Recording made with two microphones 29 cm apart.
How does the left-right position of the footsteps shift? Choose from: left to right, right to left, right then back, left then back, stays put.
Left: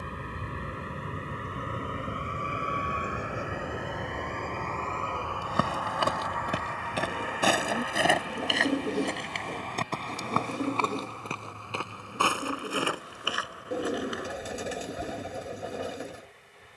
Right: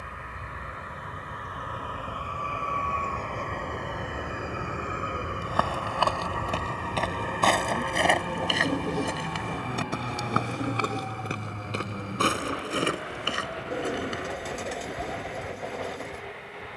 left to right.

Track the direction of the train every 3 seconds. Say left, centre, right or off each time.
left, centre, right, right, right, right.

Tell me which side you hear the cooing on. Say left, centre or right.
centre.